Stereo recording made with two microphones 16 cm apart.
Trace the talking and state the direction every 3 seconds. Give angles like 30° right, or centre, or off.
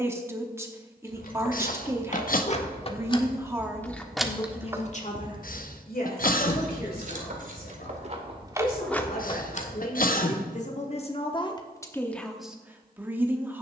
20° right, 20° left, 70° left, 50° left, 10° right.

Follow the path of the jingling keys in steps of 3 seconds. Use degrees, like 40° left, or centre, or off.
50° left, centre, 40° right, 40° left, off.